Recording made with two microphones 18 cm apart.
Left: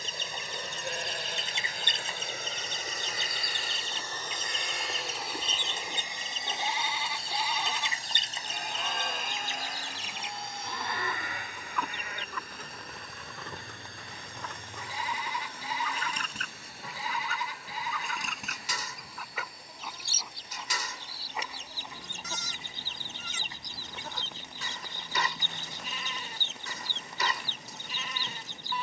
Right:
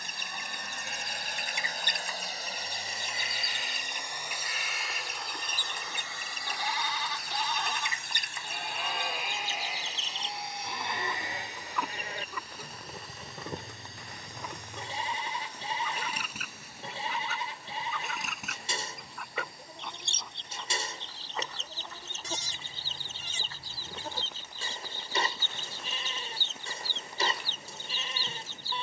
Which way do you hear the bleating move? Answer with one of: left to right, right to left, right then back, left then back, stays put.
left to right.